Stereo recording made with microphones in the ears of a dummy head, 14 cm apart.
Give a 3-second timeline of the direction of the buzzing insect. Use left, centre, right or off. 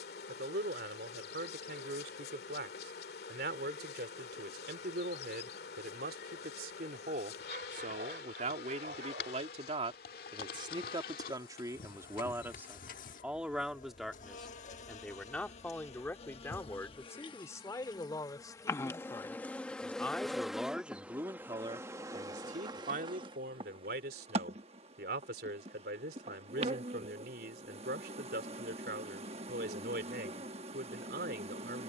left, left, left, left, left, left, centre, right, right, right, right.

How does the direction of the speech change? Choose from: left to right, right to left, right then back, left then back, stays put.
left then back.